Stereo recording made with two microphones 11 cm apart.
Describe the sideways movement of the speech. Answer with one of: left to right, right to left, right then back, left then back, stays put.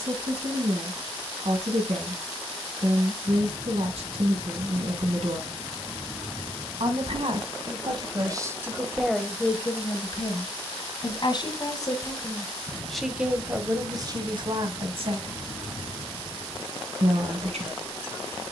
left then back.